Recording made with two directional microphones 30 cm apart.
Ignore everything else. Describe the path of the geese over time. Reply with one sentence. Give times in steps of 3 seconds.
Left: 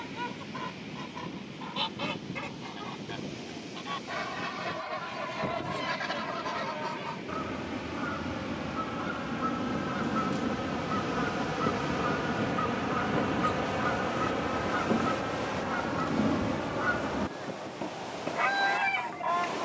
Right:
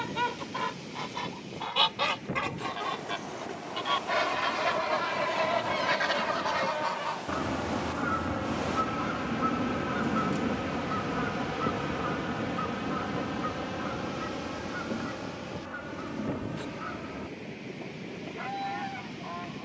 In this clip you hear the geese on the right from 0 s, in the centre from 9 s and on the left from 12 s.